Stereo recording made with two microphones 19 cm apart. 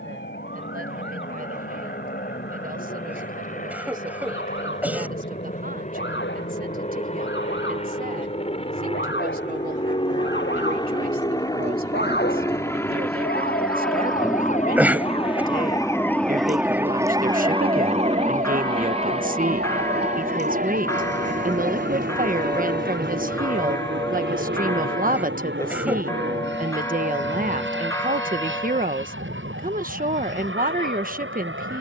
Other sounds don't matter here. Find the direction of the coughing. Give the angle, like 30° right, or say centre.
10° right.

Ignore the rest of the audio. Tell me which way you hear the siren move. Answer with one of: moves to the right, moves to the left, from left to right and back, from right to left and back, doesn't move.
moves to the right.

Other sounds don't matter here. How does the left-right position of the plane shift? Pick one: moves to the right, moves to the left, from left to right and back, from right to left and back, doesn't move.
moves to the right.